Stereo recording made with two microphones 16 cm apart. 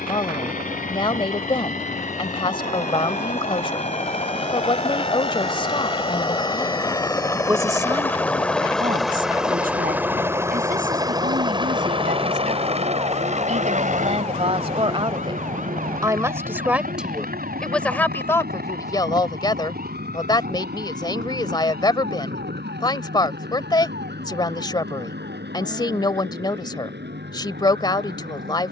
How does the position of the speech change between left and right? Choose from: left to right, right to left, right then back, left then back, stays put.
right then back.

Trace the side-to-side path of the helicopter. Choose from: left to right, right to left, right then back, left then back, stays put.
left to right.